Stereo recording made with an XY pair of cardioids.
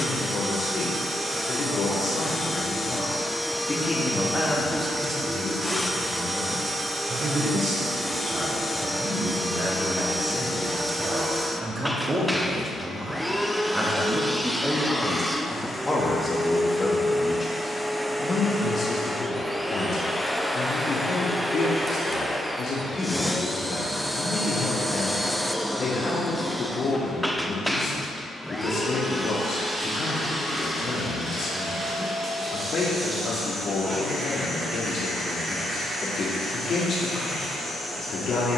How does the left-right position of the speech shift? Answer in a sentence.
In this clip you hear the speech move from left to right and back again.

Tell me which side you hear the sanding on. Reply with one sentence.
In this clip you hear the sanding on the right.